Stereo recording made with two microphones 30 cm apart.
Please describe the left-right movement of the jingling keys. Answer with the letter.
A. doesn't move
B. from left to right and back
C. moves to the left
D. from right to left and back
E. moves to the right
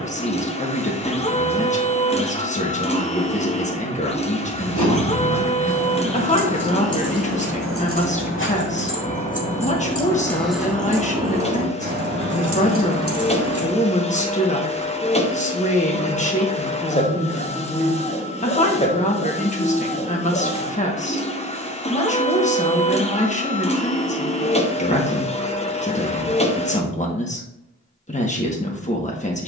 E.